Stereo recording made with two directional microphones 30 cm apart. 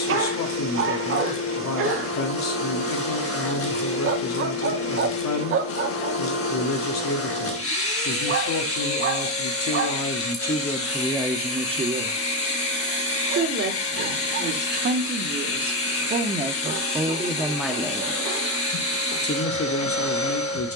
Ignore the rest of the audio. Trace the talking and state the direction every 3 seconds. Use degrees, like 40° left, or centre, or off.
60° left, 60° left, 60° left, 20° left, 40° right, 20° right, 40° left.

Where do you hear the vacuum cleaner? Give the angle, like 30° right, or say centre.
50° left.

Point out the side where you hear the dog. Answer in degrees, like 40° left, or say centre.
40° right.